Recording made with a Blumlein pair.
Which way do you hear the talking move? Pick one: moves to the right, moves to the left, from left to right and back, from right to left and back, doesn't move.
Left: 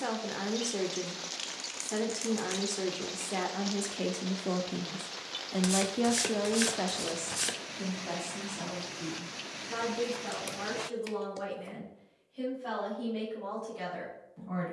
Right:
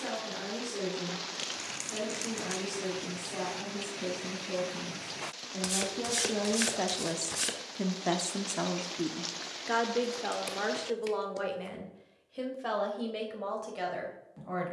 moves to the right.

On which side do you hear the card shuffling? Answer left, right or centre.
centre.